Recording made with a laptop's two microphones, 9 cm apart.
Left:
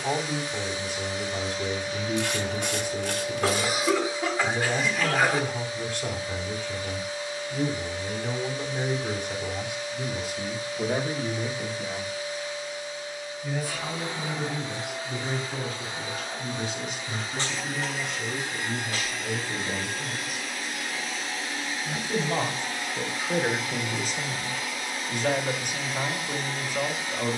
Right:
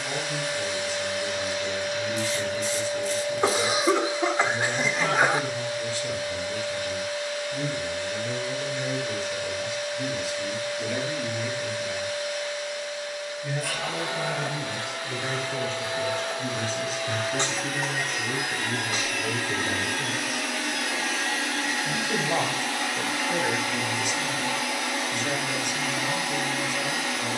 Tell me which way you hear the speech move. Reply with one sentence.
In this clip you hear the speech move from left to right and back again.